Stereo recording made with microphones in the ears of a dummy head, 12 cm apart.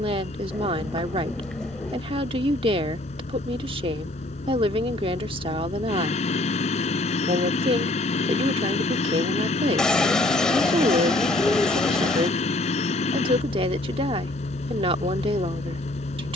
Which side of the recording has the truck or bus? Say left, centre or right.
left.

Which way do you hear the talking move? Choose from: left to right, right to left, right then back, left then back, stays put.
stays put.